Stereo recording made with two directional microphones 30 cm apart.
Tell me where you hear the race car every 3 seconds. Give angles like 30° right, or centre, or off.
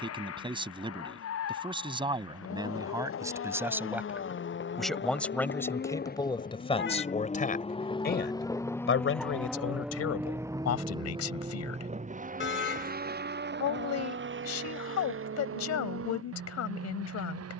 60° left, 50° left, 20° left, 10° right, 40° right, 50° right.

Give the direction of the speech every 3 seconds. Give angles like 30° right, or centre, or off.
20° right, centre, 30° left, 60° left, 70° left, 70° left.